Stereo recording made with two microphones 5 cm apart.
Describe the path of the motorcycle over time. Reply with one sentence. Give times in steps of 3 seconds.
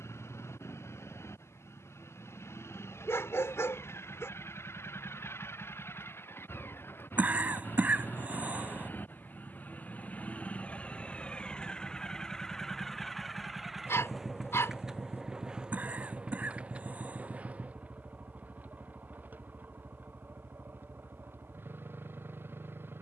You can hear the motorcycle on the left from 0 s, in the centre from 12 s and on the right from 15 s.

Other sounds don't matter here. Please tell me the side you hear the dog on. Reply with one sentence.
In this clip you hear the dog on the left.